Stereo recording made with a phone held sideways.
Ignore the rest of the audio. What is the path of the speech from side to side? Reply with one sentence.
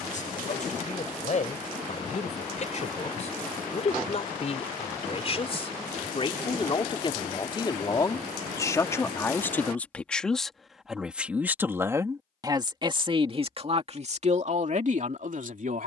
In this clip you hear the speech move to the right.